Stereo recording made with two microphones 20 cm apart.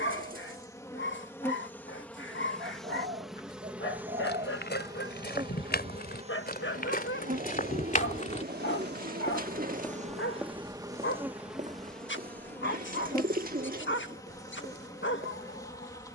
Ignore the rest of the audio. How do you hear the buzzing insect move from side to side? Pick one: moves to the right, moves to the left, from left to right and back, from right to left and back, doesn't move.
from left to right and back.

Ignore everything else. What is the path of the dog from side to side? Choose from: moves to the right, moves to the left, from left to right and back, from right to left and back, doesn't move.
doesn't move.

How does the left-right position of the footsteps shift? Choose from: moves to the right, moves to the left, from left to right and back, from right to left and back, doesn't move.
moves to the right.